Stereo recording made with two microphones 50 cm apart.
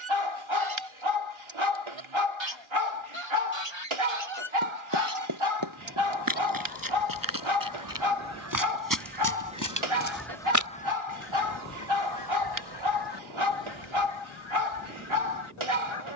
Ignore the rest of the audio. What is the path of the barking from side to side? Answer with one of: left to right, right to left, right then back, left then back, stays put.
stays put.